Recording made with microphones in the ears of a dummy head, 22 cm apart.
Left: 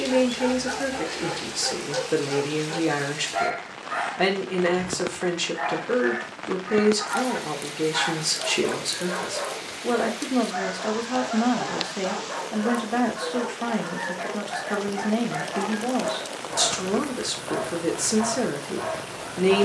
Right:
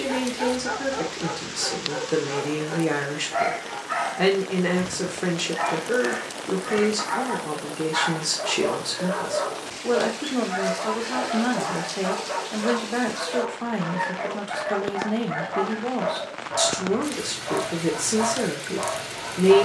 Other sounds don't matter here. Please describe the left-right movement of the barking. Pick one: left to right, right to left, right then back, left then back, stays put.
stays put.